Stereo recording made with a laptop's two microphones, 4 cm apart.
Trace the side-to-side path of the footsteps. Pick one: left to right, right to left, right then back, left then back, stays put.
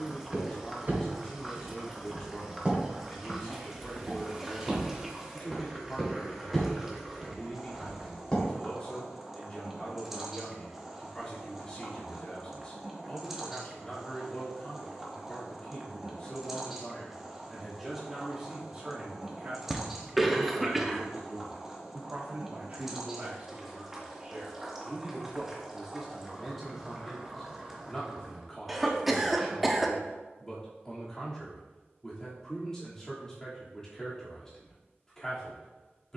right to left.